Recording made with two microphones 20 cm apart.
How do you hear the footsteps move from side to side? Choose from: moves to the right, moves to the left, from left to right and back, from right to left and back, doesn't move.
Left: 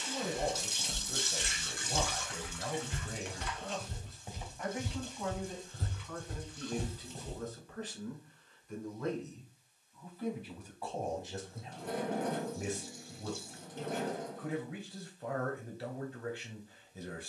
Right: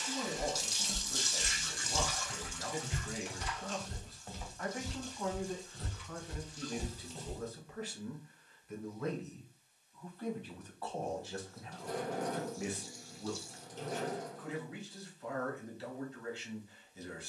from left to right and back.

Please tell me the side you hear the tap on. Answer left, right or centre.
left.